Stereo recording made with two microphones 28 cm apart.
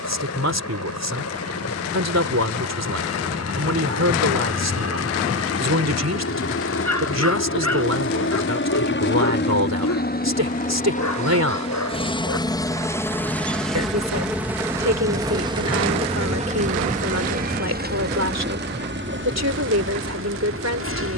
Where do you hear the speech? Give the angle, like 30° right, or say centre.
70° right.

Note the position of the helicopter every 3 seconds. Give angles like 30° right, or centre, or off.
70° left, 60° left, 50° left, 30° left, centre, 20° right, 40° right.